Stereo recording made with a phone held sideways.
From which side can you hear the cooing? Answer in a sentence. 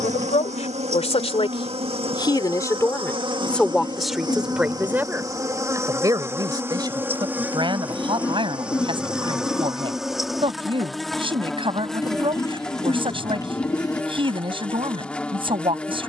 In this clip you hear the cooing on the left.